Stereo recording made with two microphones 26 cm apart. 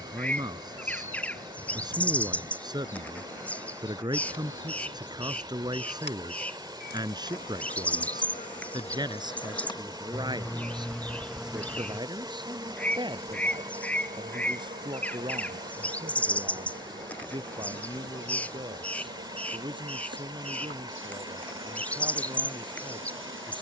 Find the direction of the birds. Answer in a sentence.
In this clip you hear the birds in the centre.